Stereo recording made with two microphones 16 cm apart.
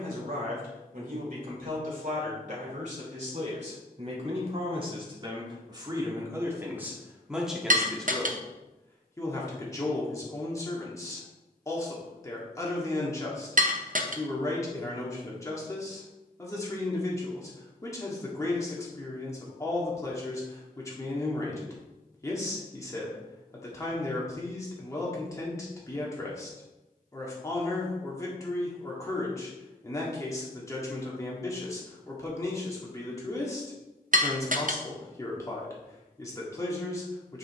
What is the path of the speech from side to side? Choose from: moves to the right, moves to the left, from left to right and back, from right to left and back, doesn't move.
moves to the left.